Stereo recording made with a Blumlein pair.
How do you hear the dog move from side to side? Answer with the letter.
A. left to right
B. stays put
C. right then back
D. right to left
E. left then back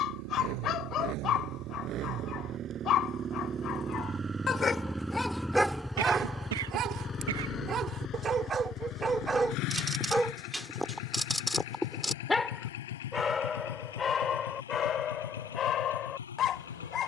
C.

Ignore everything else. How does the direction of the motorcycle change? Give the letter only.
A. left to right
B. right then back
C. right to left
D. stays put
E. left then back
C.